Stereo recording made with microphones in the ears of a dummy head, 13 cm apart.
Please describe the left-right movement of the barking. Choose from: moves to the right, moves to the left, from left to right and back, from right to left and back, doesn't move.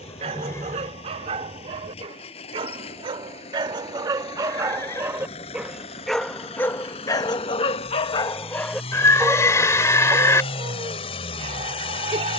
from right to left and back.